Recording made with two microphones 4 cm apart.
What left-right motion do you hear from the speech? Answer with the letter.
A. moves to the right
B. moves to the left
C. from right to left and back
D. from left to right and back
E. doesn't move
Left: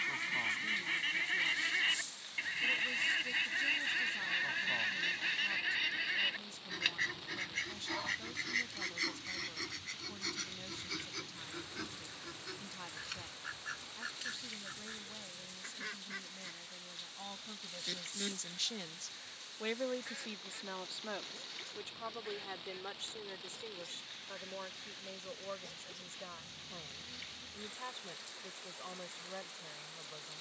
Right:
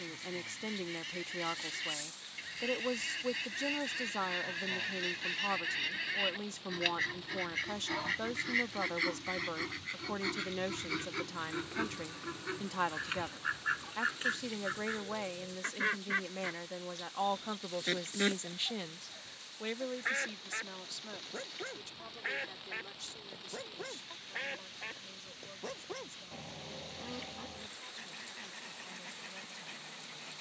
B.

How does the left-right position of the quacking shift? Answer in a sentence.
In this clip you hear the quacking move from left to right.